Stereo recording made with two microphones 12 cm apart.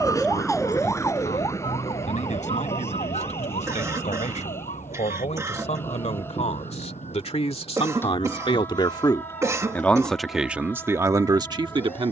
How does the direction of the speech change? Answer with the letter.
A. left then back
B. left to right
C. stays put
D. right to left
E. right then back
B.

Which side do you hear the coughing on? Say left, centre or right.
right.